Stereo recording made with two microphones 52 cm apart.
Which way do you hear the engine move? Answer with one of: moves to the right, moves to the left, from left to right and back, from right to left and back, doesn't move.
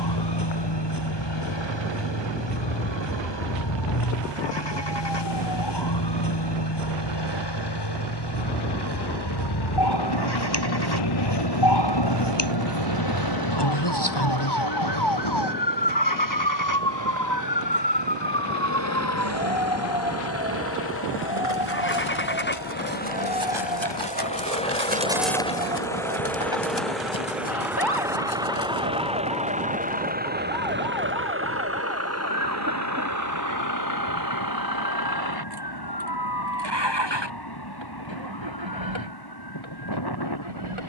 moves to the right.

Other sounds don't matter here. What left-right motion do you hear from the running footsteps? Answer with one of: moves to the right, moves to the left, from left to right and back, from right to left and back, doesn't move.
moves to the left.